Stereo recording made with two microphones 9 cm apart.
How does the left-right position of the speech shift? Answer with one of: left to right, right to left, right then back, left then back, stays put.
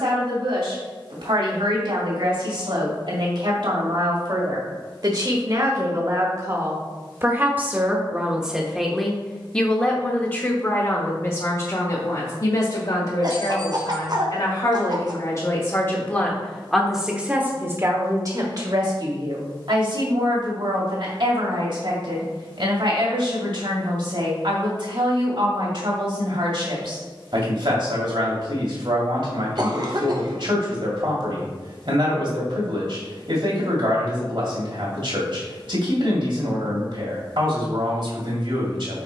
left then back.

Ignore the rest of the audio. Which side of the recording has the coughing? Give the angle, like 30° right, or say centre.
50° right.